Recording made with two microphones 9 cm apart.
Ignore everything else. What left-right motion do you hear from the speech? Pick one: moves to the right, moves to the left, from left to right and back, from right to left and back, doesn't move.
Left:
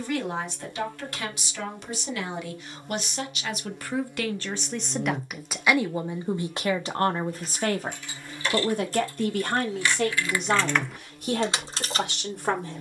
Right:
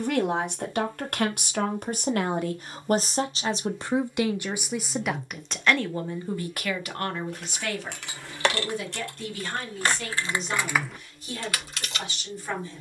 moves to the left.